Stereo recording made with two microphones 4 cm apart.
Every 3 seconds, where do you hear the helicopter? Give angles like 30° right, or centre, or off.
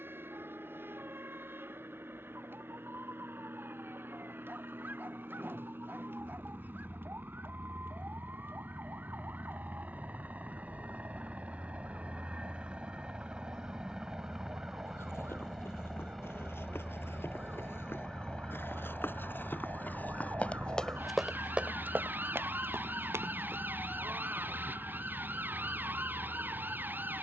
60° right, 60° right, 50° right, 40° right, 20° right, 10° left, 30° left, 40° left, 50° left.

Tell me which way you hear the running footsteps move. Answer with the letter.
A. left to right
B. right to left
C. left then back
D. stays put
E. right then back
A.